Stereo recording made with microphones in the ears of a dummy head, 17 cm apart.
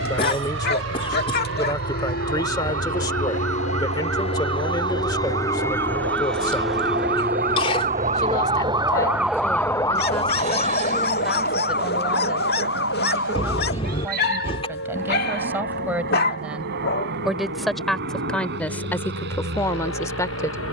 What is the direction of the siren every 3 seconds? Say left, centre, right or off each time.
right, right, right, left, left, left, left.